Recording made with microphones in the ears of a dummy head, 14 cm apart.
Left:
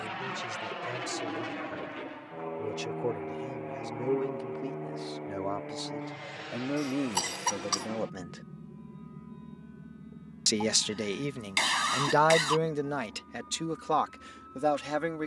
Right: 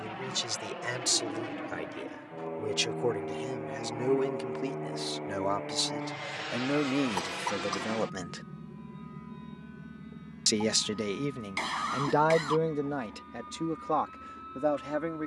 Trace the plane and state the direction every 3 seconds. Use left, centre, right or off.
left, centre, right, right, right.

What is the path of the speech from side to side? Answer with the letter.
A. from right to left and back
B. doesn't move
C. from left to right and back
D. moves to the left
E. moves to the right
D.